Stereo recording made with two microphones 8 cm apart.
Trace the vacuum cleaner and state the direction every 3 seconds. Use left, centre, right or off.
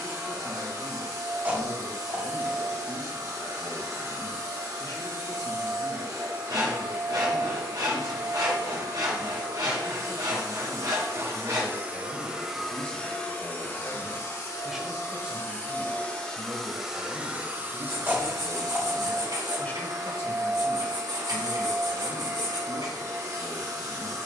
right, right, right, right, left, centre, right, right.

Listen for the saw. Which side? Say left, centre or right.
right.